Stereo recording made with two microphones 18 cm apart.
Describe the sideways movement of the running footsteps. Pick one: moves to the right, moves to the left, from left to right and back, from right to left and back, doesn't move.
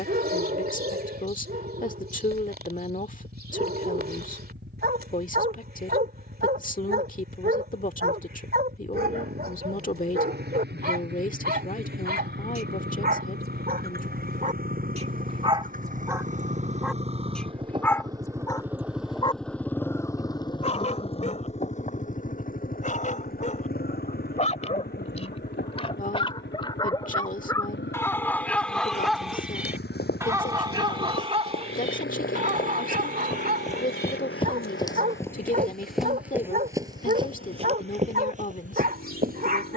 moves to the right.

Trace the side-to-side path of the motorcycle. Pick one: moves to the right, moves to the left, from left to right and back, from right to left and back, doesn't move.
moves to the left.